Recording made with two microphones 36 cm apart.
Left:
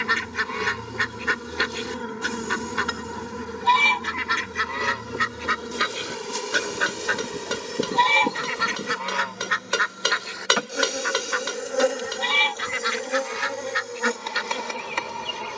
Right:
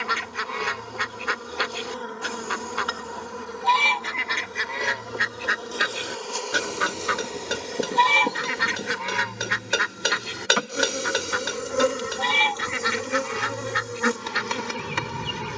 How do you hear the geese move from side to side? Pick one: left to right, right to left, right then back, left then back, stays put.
left to right.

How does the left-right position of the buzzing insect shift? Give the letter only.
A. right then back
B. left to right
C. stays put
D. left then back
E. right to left
B.